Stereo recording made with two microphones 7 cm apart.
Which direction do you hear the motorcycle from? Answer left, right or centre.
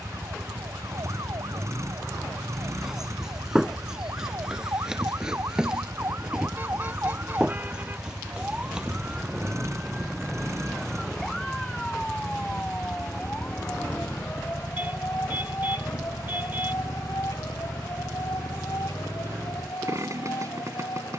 right.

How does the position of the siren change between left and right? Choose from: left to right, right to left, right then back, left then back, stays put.
right to left.